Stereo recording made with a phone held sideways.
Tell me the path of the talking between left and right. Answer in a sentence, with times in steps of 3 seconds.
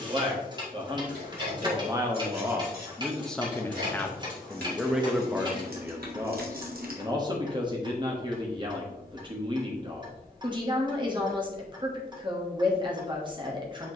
In this clip you hear the talking on the right from 0 s, in the centre from 3 s and on the right from 6 s.